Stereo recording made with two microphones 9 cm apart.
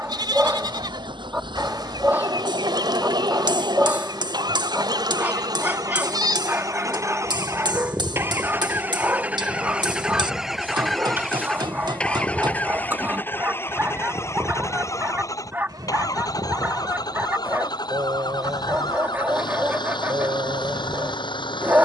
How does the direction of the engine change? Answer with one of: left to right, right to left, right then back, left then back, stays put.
right to left.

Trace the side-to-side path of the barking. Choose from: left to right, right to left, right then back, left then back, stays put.
stays put.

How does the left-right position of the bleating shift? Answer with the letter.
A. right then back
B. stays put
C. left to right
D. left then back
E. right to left
D.